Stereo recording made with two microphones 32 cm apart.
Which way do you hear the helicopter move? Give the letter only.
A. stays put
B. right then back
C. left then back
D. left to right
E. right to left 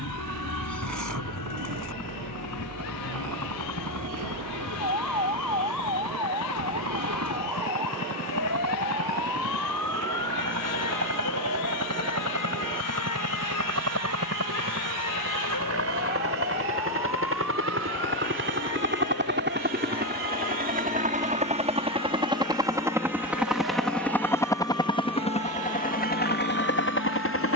E.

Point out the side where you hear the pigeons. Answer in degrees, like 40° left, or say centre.
70° right.